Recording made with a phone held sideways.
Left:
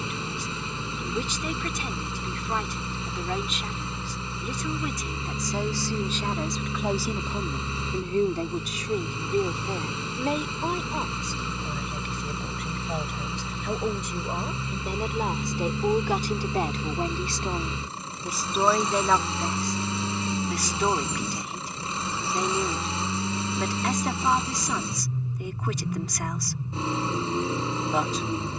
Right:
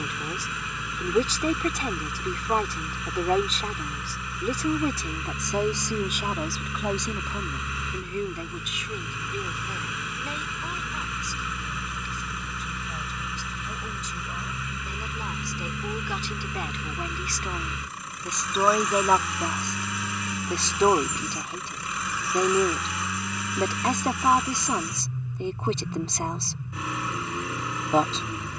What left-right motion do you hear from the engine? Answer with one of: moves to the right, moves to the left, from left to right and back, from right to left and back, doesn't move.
doesn't move.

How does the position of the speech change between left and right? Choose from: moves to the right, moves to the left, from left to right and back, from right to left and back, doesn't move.
from right to left and back.